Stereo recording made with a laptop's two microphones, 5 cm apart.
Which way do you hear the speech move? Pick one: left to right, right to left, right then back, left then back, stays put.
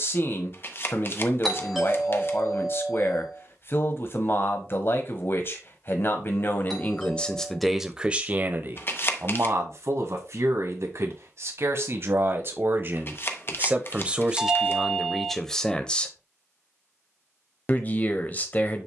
right then back.